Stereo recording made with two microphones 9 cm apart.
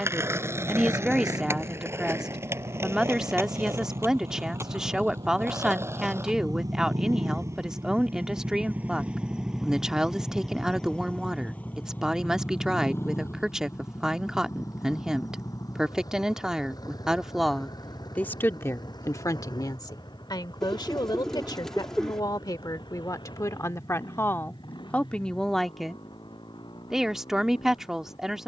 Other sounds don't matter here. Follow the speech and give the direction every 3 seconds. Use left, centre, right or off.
centre, centre, centre, centre, centre, centre, left, left, centre, centre.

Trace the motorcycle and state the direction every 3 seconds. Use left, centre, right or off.
right, right, right, centre, left, left, left, left, left, left.